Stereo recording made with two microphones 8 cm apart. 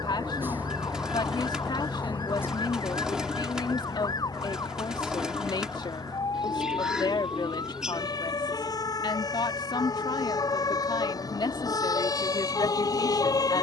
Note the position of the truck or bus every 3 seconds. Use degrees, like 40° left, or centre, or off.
centre, 50° left, 60° left, 70° left, 70° left.